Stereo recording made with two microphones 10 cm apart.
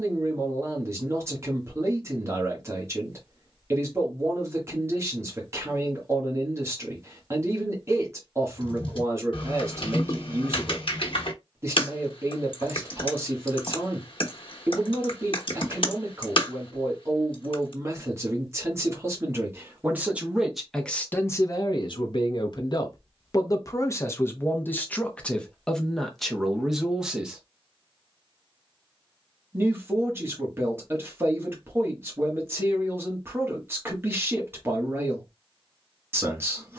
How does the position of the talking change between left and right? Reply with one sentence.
You can hear the talking move from right to left and back again.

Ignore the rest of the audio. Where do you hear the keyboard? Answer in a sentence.
In this clip you hear the keyboard on the left.